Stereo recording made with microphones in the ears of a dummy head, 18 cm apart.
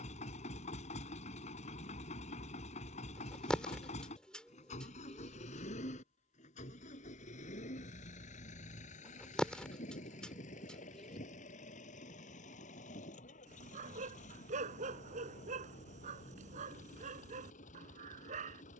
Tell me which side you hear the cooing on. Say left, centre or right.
centre.